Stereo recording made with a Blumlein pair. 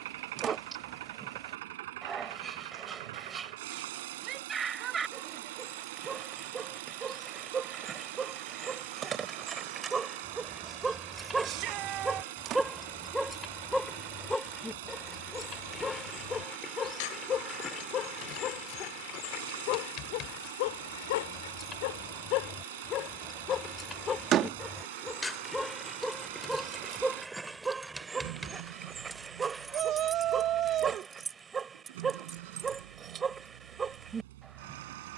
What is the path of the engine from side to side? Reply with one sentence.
In this clip you hear the engine stay in one place.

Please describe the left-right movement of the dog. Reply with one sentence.
In this clip you hear the dog move from right to left and back again.